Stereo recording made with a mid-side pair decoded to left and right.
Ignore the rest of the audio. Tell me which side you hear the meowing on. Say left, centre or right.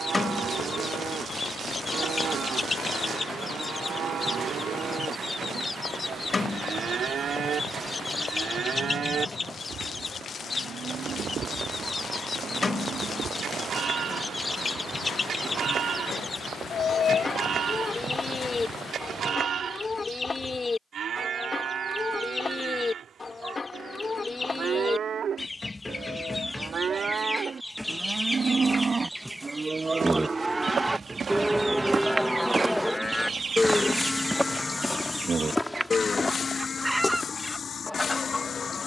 left.